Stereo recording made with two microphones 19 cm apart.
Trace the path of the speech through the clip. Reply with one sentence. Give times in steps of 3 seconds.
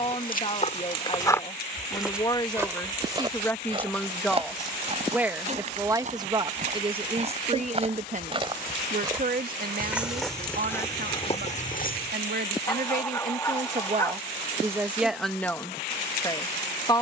In this clip you hear the speech on the left from 0 s, in the centre from 3 s, on the right from 6 s and in the centre from 15 s.